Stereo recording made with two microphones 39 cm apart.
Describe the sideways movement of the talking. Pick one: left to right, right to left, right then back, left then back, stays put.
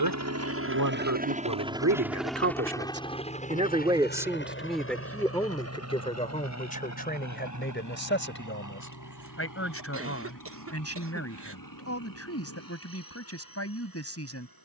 right to left.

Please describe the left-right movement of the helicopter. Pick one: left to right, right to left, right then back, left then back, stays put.
right to left.